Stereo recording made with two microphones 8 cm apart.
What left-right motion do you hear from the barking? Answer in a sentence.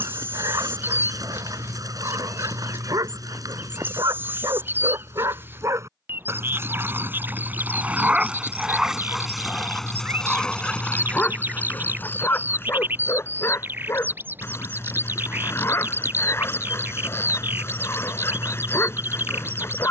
In this clip you hear the barking move to the left.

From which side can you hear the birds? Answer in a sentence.
You can hear the birds on the right.